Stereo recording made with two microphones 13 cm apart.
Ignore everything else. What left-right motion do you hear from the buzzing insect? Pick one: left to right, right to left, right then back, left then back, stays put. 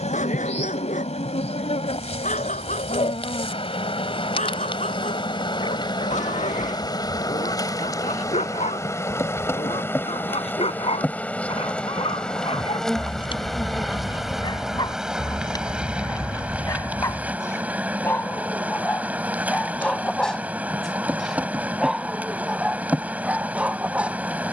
left to right.